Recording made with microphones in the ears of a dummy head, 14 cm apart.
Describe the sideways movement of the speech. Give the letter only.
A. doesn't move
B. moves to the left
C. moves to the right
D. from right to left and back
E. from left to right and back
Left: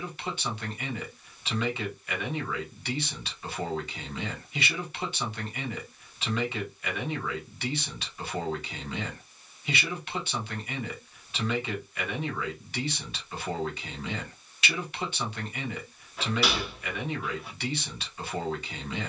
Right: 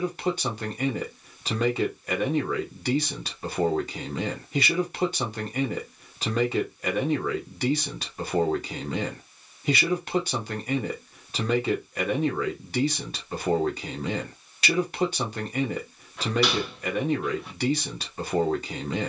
A.